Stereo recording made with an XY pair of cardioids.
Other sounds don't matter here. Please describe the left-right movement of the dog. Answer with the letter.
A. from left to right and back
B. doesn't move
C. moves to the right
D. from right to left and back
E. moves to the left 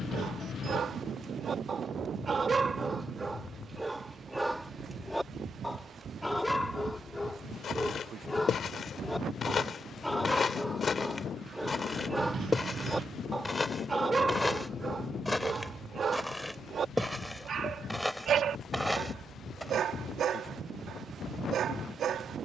D.